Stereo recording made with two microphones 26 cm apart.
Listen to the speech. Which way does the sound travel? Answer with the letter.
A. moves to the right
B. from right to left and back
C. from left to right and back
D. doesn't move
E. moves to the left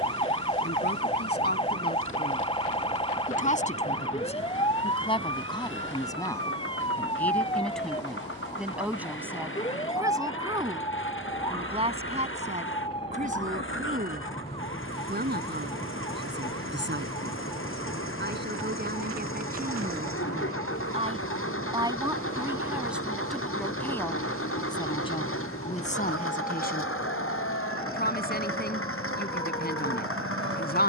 C.